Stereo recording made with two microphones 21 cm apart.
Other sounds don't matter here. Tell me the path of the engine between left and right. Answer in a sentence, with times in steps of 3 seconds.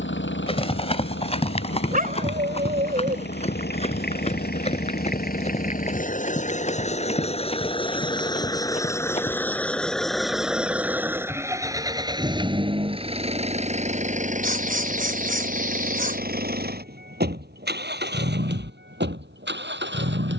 You can hear the engine on the left from 0 s, in the centre from 9 s and on the right from 12 s.